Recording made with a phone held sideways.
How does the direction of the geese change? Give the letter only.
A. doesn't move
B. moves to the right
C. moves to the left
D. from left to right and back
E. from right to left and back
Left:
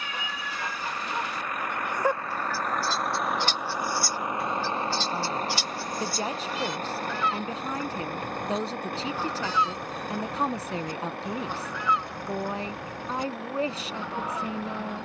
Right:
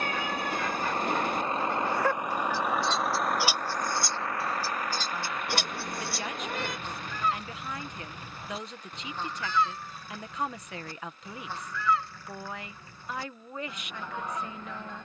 D.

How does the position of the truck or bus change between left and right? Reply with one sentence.
In this clip you hear the truck or bus move to the left.